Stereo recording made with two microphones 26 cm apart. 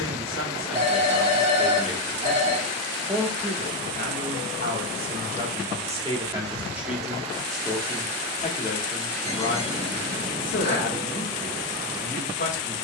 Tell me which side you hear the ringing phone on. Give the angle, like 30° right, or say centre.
20° right.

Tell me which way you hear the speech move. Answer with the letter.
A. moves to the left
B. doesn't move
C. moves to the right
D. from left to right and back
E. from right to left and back
D.